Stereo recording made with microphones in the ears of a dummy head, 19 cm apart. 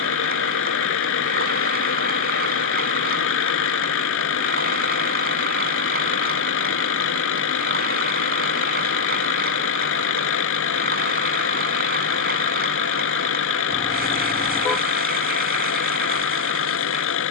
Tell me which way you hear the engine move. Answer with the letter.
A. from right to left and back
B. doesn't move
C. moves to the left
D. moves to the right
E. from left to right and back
B.